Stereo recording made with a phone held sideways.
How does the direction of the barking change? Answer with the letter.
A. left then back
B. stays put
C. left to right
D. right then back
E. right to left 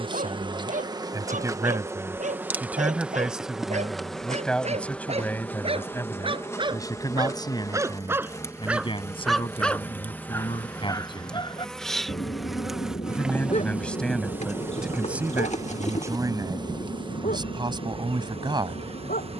E.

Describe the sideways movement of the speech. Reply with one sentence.
You can hear the speech move from right to left and back again.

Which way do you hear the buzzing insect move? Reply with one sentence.
In this clip you hear the buzzing insect go left and come back.